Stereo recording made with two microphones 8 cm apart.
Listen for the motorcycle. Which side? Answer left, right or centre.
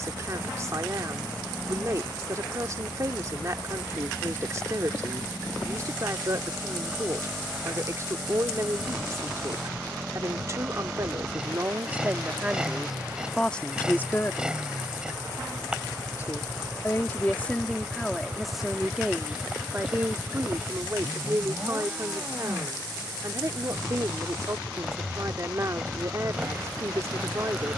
centre.